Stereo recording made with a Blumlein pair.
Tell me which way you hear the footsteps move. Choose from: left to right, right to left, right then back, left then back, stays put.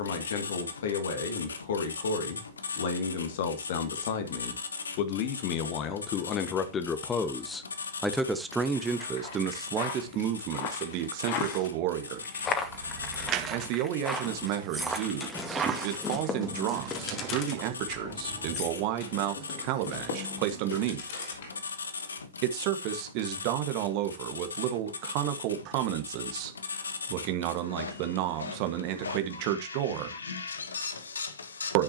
left to right.